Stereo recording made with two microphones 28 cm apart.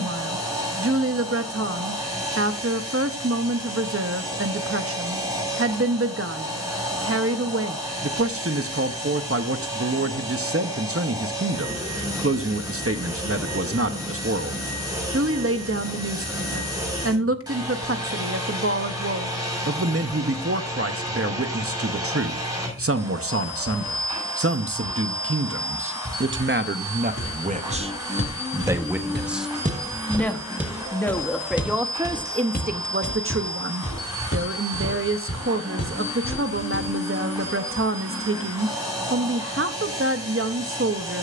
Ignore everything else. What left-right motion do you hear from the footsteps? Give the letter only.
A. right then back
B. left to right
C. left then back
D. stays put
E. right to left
E.